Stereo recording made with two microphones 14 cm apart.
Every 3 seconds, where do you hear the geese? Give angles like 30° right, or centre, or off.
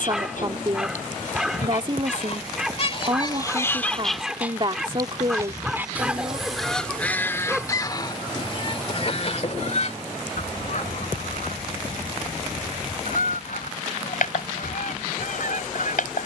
60° left, centre, 20° left, 60° left, 70° left, 70° left.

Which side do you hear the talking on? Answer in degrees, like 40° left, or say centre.
40° right.